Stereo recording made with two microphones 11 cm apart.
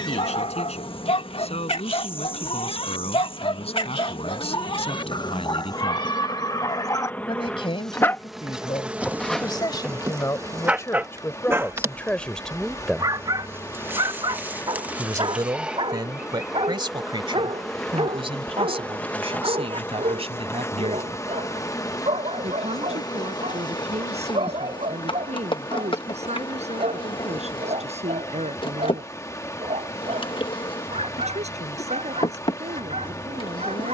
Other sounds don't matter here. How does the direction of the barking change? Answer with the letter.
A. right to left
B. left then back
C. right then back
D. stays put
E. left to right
E.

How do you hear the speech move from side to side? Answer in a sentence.
You can hear the speech travel towards the right.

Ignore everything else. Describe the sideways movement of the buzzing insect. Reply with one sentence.
You can hear the buzzing insect go right and come back.